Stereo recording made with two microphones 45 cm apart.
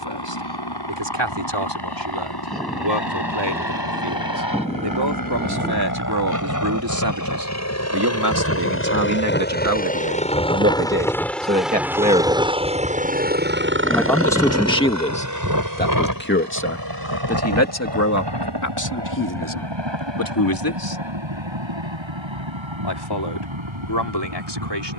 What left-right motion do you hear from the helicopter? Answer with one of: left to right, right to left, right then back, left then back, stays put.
left to right.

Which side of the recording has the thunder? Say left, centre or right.
centre.